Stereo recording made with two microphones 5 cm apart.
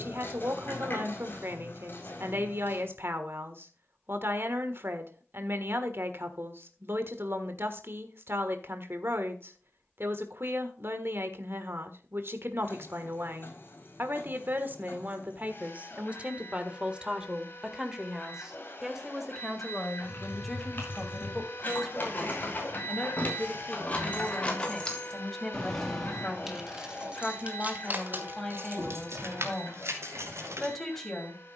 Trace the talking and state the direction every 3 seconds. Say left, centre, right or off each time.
right, right, right, right, right, right, centre, centre, centre, centre, centre.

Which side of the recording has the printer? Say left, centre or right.
left.